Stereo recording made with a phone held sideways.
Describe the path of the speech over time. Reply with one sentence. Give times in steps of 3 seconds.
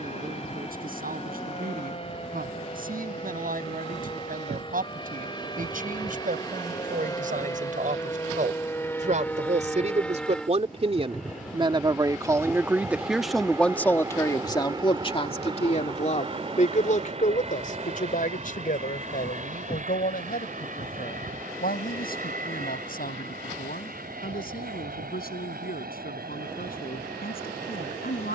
You can hear the speech on the right from 0 s, in the centre from 12 s and on the left from 15 s.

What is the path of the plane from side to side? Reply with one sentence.
You can hear the plane go from the left side to the right.